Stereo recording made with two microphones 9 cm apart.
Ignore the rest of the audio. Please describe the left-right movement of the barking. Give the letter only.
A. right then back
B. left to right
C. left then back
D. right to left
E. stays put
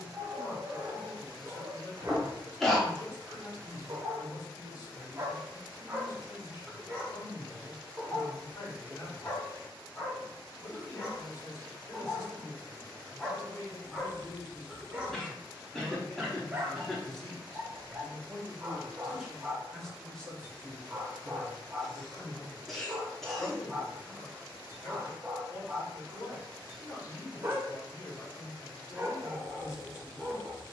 C.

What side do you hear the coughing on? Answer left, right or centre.
centre.